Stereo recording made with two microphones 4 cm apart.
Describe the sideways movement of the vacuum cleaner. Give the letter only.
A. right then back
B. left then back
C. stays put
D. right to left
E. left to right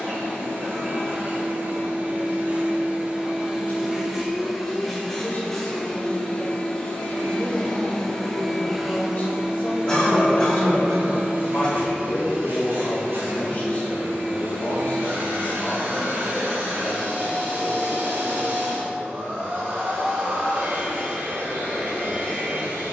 B.